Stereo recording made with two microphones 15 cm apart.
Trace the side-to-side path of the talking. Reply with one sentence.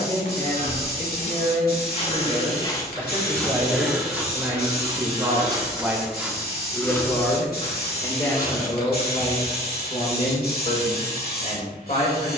You can hear the talking travel towards the left.